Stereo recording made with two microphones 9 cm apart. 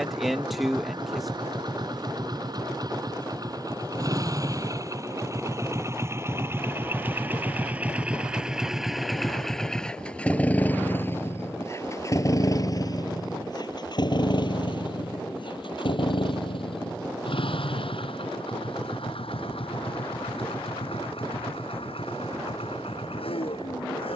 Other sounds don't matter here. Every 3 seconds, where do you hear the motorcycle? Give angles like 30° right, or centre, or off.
50° right, 40° right, 20° right, 20° left, 50° left, 70° left, 80° left, 80° left.